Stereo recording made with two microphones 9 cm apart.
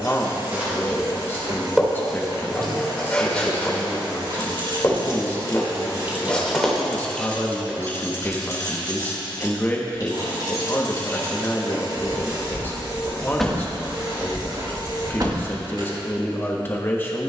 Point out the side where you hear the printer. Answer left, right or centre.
right.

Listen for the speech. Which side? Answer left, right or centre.
left.